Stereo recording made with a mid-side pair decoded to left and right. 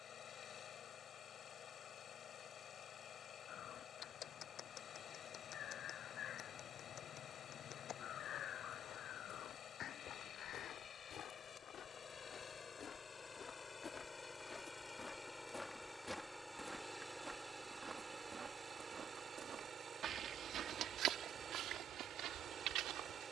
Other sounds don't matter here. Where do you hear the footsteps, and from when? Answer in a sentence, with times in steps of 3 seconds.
You can hear the footsteps not at all from 0 s, on the left from 9 s, in the centre from 15 s and on the right from 18 s.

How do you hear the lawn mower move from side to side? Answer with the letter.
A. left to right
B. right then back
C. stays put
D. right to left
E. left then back
A.